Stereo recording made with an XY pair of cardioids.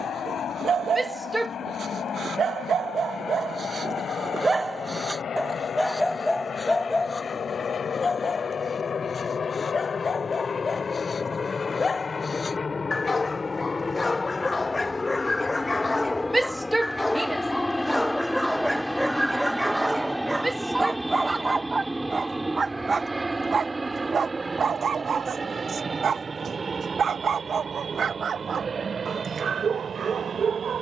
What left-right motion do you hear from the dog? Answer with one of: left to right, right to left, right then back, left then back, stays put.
left then back.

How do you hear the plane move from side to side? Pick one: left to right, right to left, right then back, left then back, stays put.
left to right.